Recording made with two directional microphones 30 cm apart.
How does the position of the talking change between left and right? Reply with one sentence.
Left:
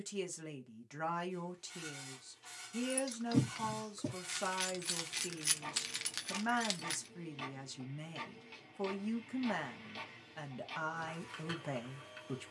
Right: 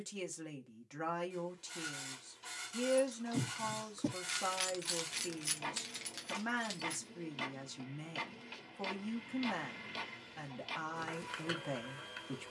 In this clip you hear the talking stay in one place.